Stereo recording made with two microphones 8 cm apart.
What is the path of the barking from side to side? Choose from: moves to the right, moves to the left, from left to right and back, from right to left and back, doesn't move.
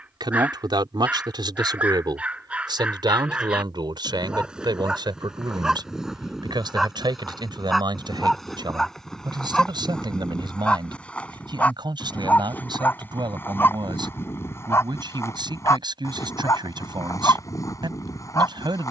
moves to the left.